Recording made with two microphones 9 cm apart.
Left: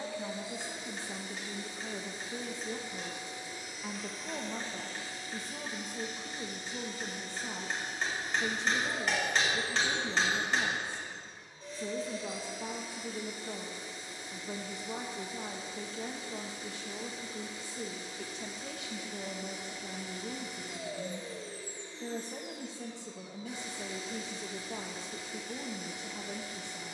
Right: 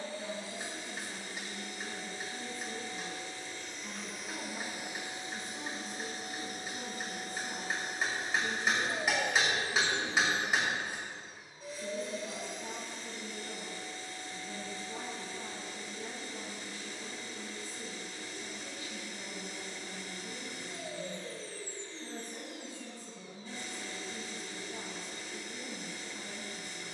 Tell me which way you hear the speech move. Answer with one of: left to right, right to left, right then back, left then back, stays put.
stays put.